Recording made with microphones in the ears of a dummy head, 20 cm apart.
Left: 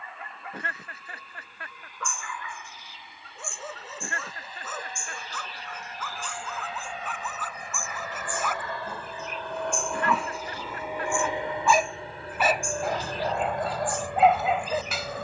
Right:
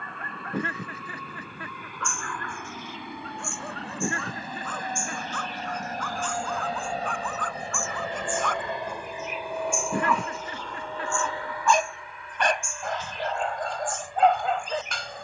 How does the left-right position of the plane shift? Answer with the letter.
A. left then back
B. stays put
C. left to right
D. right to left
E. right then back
D.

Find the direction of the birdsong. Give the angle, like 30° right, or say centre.
30° left.